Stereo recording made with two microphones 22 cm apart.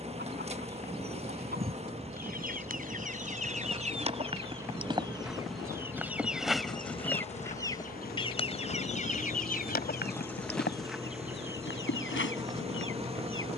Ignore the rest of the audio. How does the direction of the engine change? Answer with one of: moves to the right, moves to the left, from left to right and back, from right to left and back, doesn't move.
doesn't move.